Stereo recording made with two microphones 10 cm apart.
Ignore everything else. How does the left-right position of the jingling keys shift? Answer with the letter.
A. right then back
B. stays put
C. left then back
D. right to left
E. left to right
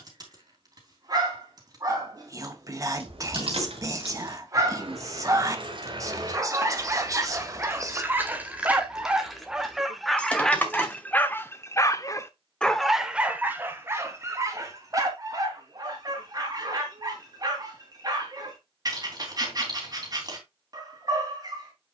D.